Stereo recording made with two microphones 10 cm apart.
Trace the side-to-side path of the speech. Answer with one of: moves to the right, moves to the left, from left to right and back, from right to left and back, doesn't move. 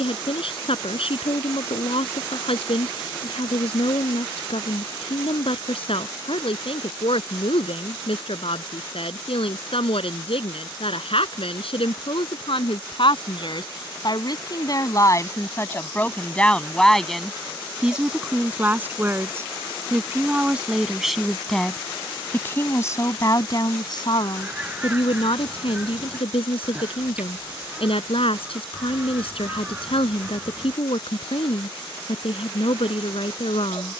from left to right and back.